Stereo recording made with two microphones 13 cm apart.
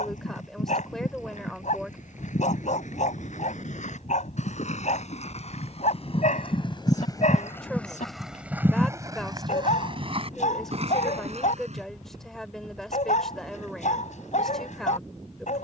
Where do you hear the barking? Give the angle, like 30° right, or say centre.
70° left.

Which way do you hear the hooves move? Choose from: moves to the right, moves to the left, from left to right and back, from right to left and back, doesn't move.
moves to the right.